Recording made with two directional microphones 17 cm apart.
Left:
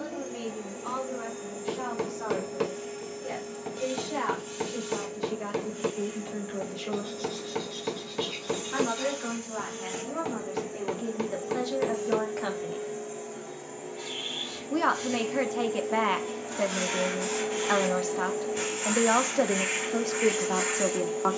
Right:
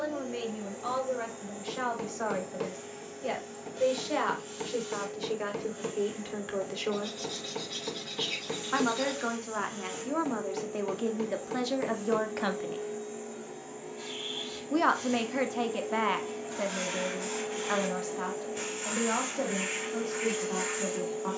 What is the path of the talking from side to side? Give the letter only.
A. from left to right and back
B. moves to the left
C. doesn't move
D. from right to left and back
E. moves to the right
B.